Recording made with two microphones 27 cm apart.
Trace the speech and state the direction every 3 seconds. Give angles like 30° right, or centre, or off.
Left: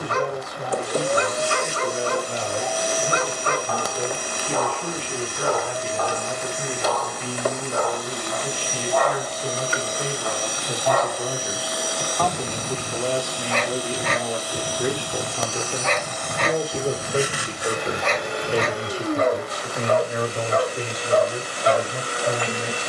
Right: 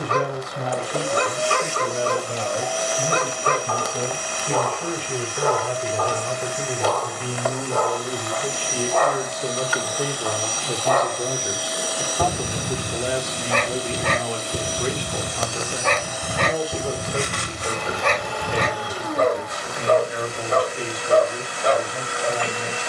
70° right, 60° right, 50° right, 30° right, centre, 20° left, 40° left, 50° left.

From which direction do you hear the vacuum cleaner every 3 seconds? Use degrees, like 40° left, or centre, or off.
40° left, 40° left, 40° left, 20° left, 20° right, centre, 30° left, 40° left.